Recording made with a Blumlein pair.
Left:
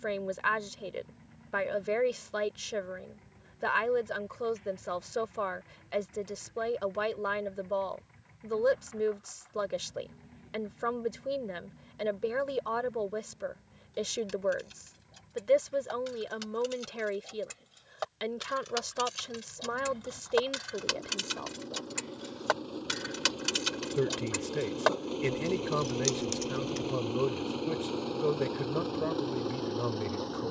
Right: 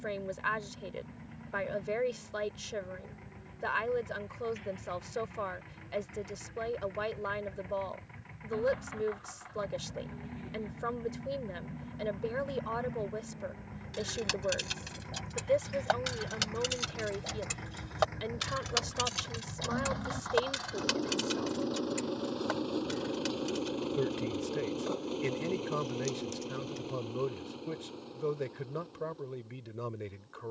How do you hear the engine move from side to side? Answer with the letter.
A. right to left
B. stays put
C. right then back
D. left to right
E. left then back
A.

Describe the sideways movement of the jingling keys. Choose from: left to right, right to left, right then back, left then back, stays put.
right to left.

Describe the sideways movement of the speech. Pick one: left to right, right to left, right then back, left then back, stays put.
stays put.